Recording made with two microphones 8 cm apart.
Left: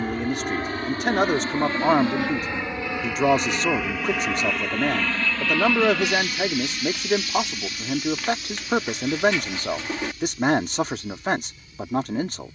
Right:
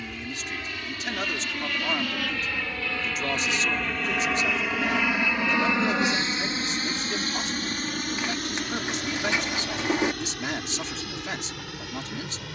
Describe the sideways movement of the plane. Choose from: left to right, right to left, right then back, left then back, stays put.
left to right.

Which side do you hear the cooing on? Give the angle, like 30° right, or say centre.
20° right.